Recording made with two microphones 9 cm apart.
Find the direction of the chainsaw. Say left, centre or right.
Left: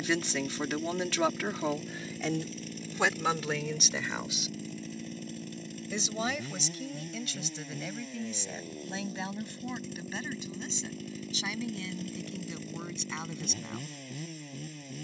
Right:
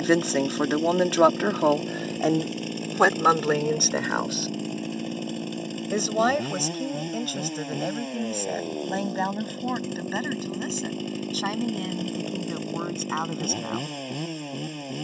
right.